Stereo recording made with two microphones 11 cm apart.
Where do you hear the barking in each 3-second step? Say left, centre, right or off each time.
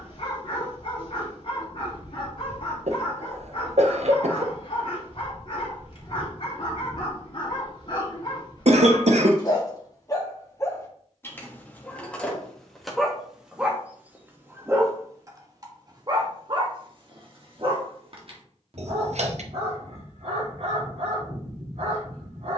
left, left, left, left, centre, right, right, right.